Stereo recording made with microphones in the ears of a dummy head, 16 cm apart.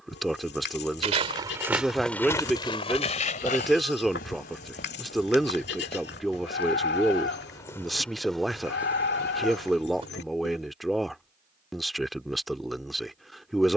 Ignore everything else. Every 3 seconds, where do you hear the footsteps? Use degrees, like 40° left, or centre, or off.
centre, 50° left, 20° left, 20° right, off.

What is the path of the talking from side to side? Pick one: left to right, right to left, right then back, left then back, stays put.
stays put.